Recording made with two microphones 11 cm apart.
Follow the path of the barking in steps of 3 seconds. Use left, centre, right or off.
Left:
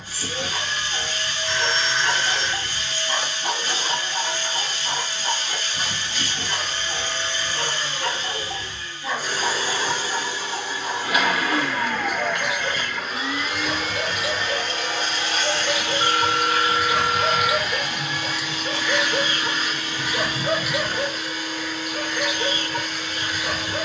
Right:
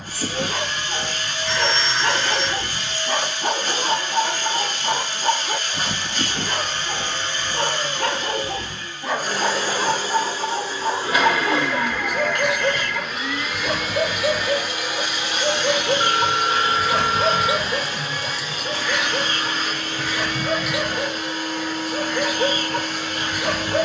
right, right, right, right, right, right, centre, right.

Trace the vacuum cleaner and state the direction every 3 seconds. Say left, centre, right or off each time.
right, right, right, right, centre, right, right, right.